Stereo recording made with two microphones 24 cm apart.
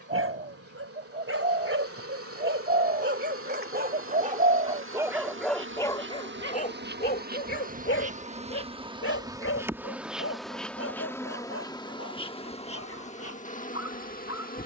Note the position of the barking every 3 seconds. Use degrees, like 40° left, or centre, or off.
60° right, 20° right, 40° left, 70° left, 80° left.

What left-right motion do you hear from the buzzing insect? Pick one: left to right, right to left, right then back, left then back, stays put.
right to left.